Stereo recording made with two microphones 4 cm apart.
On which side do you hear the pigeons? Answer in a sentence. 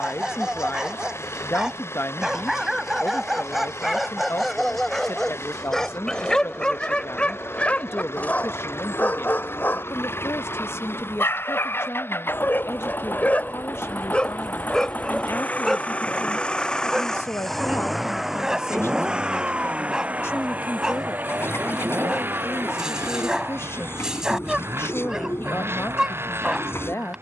In this clip you hear the pigeons on the left.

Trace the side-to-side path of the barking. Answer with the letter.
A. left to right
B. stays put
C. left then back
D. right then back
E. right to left
C.